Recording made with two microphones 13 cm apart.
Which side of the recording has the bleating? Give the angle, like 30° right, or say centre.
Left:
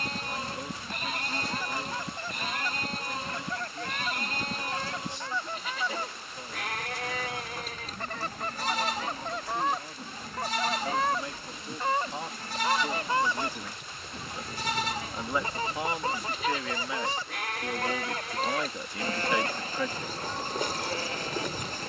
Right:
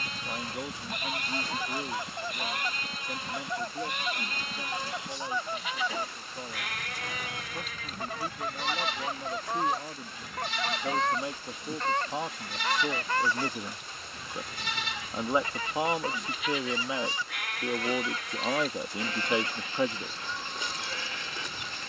40° left.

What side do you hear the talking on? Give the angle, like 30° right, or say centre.
20° right.